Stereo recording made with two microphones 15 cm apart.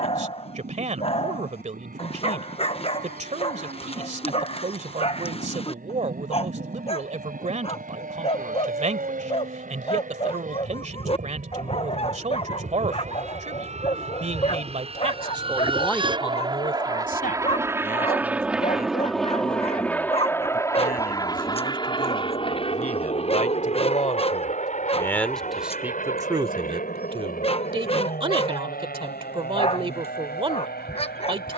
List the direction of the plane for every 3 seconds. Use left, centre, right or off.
right, right, right, right, right, right, centre, left, left, left, left.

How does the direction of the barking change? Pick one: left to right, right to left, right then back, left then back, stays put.
stays put.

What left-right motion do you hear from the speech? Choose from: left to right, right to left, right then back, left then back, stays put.
left then back.